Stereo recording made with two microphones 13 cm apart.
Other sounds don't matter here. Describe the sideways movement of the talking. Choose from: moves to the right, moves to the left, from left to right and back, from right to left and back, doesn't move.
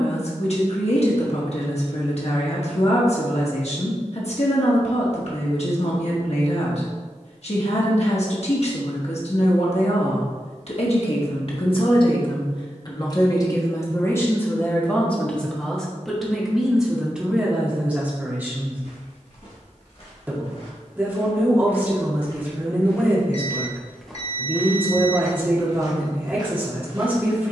moves to the right.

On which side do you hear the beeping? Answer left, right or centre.
left.